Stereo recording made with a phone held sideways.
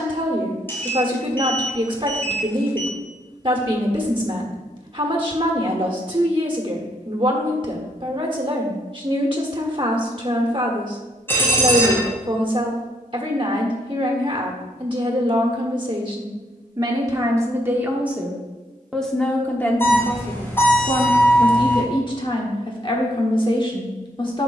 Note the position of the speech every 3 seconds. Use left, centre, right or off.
right, right, right, right, right, right, centre, left.